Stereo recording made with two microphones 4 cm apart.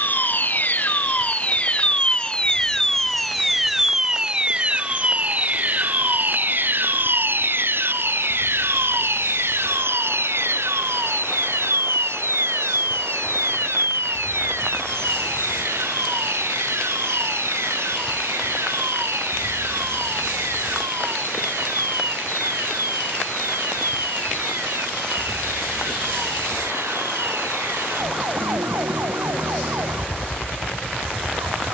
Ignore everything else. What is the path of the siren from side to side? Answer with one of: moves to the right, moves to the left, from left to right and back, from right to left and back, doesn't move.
moves to the right.